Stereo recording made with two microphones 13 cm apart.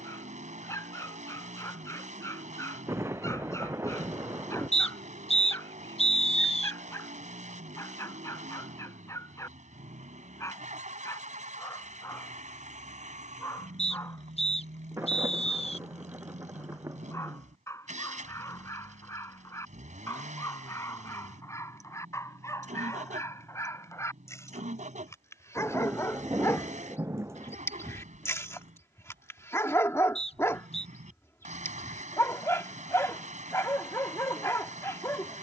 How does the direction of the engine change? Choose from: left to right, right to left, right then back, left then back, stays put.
stays put.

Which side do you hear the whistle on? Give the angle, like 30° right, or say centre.
50° left.